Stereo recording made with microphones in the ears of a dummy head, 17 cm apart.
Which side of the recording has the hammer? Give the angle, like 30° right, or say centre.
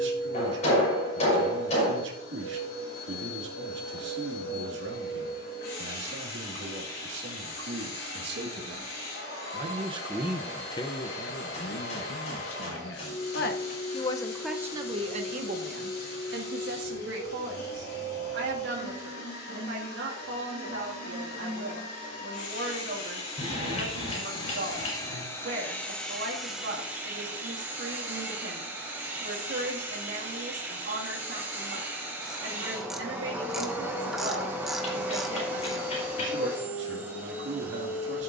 30° left.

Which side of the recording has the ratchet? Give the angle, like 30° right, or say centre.
centre.